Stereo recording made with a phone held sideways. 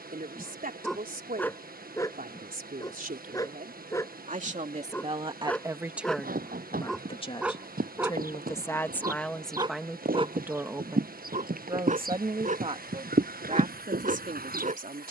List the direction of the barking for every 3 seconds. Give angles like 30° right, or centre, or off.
10° left, 20° left, 10° right, 40° right, 50° right.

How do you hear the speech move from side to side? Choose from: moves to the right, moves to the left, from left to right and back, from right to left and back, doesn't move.
from right to left and back.